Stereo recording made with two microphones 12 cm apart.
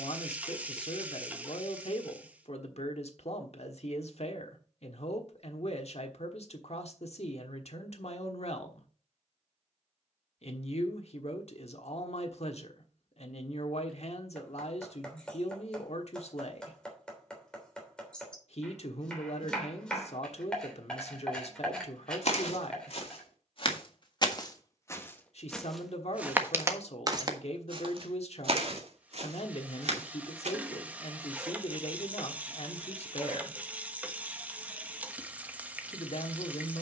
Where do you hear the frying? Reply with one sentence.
You can hear the frying in the centre.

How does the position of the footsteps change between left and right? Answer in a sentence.
You can hear the footsteps move to the right.